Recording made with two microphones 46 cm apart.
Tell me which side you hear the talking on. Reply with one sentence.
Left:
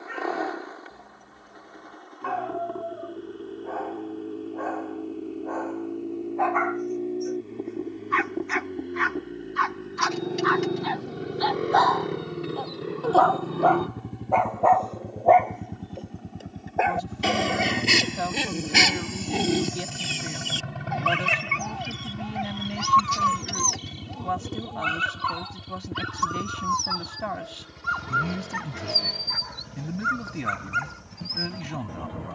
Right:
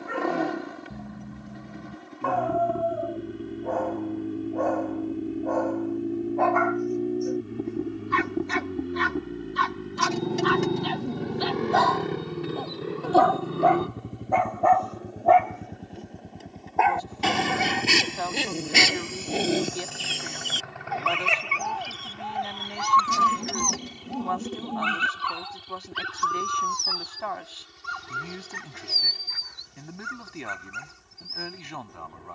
You can hear the talking on the left.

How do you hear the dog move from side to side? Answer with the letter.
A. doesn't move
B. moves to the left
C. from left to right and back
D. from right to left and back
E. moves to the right
B.